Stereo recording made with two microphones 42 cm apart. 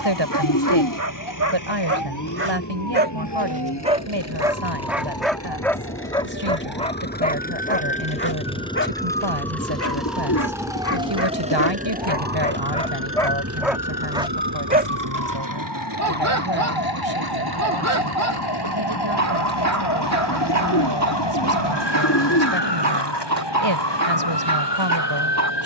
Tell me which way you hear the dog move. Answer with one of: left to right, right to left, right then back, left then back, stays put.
left then back.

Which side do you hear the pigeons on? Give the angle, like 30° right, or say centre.
50° left.